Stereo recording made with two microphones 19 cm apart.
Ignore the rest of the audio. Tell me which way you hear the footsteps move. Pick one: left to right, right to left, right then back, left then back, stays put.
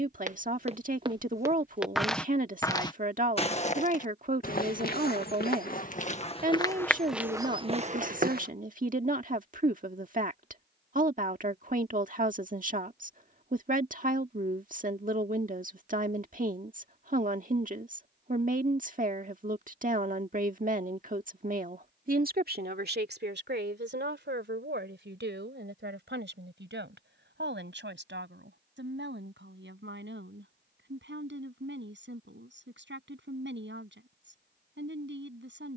left then back.